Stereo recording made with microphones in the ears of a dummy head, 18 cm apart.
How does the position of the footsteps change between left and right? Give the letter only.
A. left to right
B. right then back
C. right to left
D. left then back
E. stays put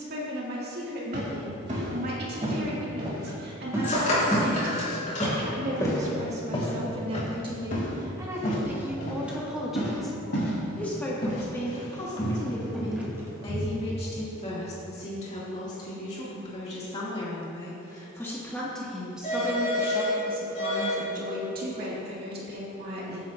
D.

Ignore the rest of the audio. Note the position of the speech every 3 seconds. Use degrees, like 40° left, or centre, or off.
50° right, 50° right, 20° right, centre, 30° left, 30° left, 10° right, 50° right.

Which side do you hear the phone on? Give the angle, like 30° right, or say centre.
40° left.